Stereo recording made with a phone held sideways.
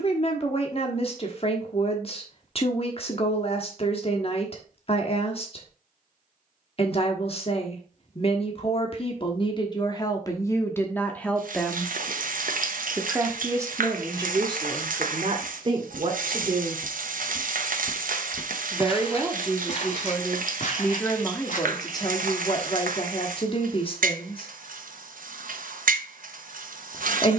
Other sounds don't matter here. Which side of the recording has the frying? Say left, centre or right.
right.